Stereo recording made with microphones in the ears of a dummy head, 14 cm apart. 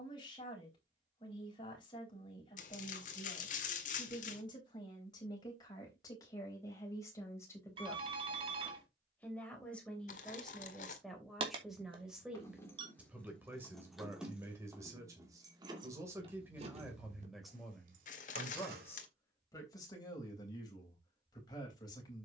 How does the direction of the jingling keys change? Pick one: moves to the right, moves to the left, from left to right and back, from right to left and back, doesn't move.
moves to the right.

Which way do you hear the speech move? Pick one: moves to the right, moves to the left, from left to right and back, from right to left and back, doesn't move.
from left to right and back.